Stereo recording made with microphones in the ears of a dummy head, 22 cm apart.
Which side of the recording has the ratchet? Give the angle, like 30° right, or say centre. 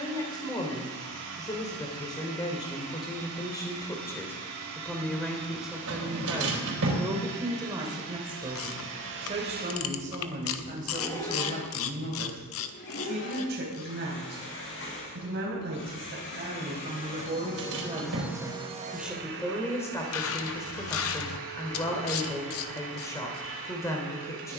60° left.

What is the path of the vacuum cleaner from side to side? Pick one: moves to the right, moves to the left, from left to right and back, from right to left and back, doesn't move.
from right to left and back.